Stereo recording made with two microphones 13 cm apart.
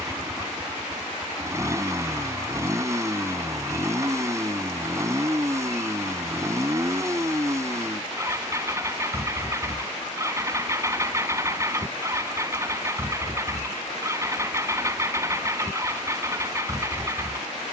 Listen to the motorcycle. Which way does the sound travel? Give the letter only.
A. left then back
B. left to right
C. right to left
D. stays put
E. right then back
D.